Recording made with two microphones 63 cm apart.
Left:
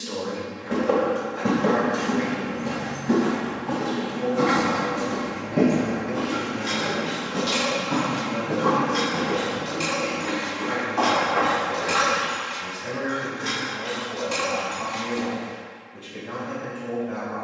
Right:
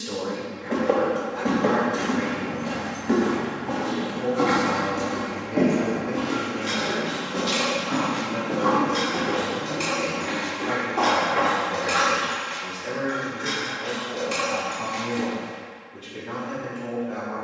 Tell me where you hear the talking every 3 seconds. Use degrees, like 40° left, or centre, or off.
40° right, centre, 20° left, 40° left, 50° left, 50° left.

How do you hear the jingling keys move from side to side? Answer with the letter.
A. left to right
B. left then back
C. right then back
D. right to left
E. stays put
A.